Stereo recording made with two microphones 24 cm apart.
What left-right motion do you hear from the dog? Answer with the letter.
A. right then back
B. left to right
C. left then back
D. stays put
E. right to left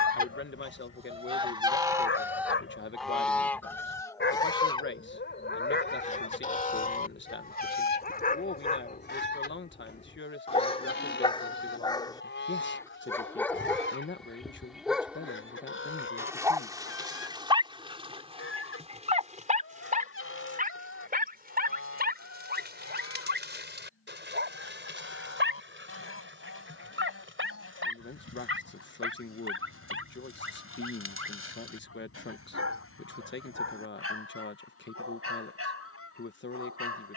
B.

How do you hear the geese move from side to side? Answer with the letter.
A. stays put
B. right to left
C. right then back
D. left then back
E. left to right
B.